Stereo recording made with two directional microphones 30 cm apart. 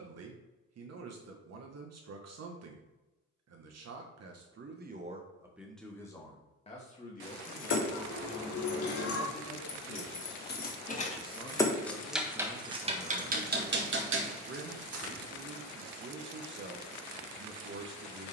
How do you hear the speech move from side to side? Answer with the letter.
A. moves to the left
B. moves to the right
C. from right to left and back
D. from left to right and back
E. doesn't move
C.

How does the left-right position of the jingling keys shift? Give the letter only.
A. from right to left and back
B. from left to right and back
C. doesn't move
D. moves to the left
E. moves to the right
E.